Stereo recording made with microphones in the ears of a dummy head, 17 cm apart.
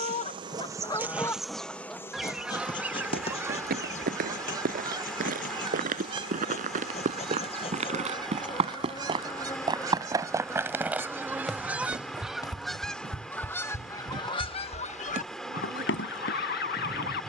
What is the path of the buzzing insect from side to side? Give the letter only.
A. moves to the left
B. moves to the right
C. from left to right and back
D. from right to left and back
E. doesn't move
D.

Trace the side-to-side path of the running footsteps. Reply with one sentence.
You can hear the running footsteps travel towards the left.